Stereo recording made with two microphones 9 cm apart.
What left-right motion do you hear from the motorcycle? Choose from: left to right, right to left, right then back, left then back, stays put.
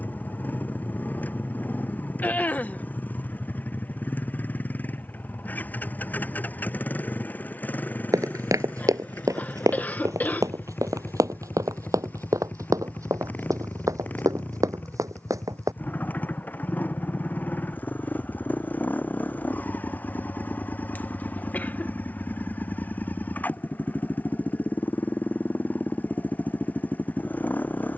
stays put.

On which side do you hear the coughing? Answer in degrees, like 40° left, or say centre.
20° left.